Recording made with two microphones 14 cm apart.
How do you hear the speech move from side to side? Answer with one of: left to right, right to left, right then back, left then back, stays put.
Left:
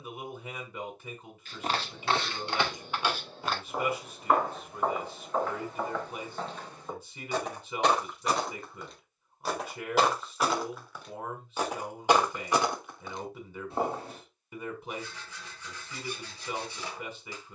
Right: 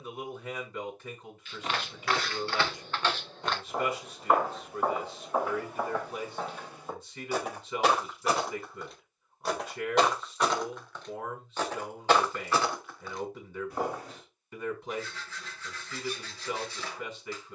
stays put.